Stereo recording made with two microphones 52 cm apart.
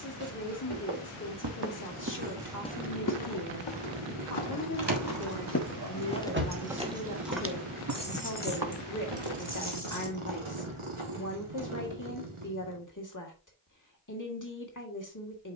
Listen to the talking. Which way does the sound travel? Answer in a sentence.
In this clip you hear the talking stay put.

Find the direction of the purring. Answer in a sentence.
In this clip you hear the purring on the right.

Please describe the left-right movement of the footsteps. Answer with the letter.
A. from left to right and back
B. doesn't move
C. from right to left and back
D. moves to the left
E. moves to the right
C.